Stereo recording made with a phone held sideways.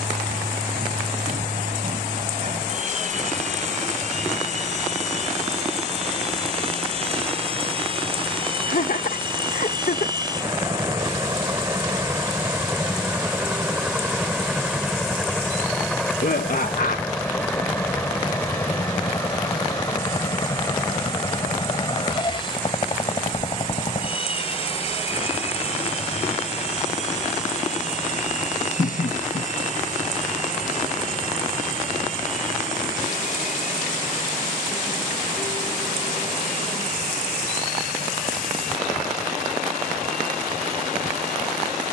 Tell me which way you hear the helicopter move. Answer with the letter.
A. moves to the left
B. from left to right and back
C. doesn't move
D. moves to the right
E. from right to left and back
A.